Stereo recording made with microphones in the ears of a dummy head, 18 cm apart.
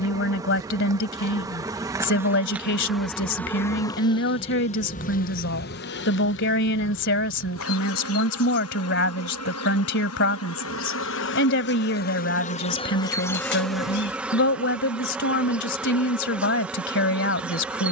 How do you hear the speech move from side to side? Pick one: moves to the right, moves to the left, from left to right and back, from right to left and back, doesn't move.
doesn't move.